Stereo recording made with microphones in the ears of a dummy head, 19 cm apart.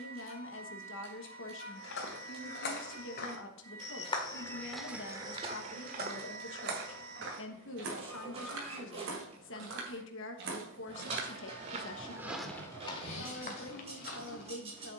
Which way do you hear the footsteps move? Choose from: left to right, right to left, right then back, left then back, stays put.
right then back.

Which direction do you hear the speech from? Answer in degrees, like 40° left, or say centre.
60° left.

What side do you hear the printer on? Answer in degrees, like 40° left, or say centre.
30° right.